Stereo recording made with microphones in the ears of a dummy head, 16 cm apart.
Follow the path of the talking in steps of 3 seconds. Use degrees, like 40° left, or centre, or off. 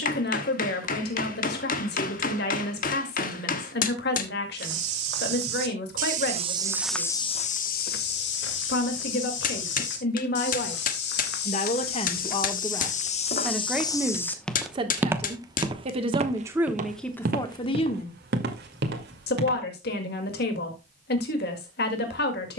60° left, 60° left, 60° left, 50° left, centre, 10° right, 60° left, 60° left.